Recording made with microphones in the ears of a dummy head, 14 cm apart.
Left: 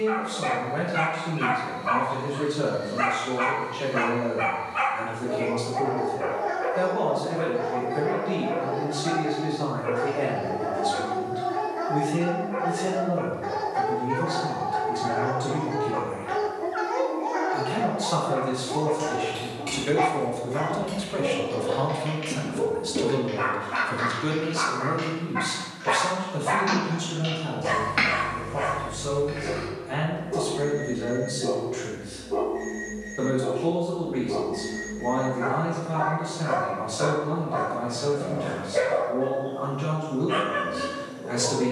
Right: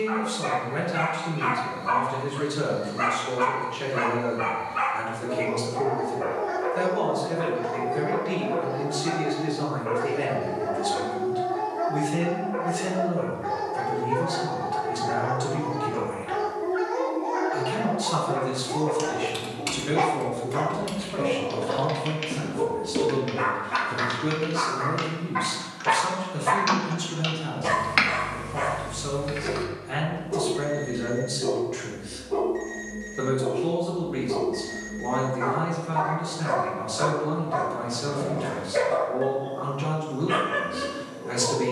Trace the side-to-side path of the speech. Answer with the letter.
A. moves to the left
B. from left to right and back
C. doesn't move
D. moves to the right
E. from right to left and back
E.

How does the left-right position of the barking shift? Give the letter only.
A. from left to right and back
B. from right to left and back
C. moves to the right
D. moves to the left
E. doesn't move
C.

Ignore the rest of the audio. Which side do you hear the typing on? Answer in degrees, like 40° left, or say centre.
50° right.